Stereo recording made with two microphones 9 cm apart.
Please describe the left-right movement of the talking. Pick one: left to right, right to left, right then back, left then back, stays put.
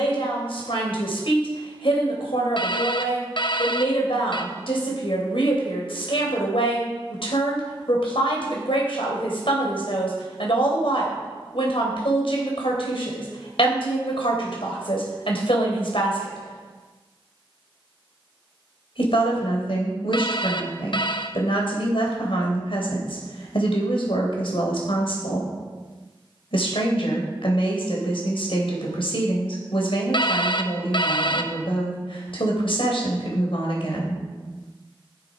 stays put.